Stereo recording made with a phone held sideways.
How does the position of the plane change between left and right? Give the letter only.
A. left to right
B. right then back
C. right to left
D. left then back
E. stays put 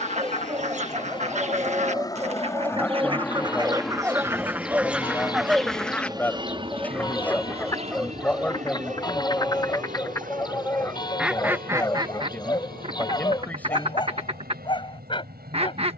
A.